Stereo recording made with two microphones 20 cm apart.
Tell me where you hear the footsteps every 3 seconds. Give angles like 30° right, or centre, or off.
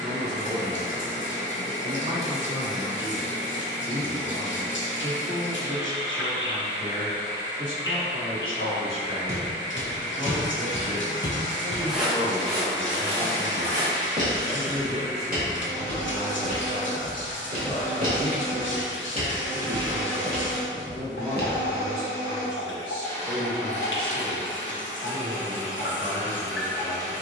off, off, off, 30° left, 30° right, 50° right, 20° right, 50° left, off.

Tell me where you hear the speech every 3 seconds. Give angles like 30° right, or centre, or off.
30° right, 30° right, 30° right, 20° right, 10° left, 40° left, 20° left, 10° right, 20° right.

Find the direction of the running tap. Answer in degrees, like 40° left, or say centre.
70° left.